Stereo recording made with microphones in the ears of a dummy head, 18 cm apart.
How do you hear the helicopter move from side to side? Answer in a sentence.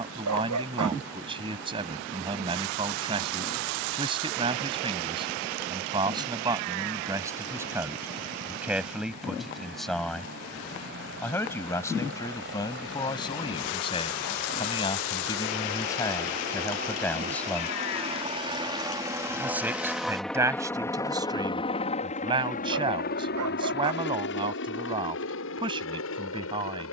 You can hear the helicopter move from right to left.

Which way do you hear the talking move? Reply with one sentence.
In this clip you hear the talking go left and come back.